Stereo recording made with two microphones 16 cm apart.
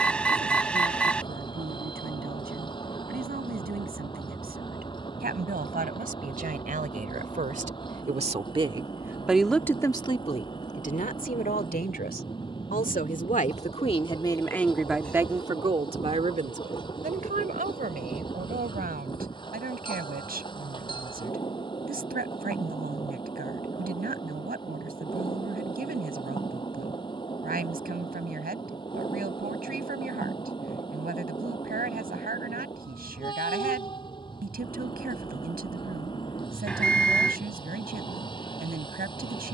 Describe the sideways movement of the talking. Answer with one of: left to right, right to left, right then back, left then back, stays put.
left then back.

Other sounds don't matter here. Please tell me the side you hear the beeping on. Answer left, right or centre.
centre.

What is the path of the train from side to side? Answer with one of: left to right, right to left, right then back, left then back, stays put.
stays put.